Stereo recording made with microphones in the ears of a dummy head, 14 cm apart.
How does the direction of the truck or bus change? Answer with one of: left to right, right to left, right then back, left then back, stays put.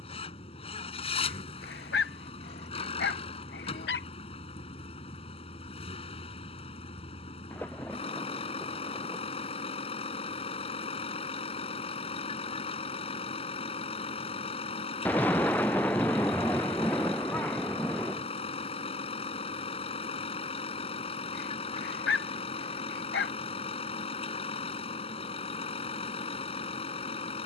stays put.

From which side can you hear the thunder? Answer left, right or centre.
centre.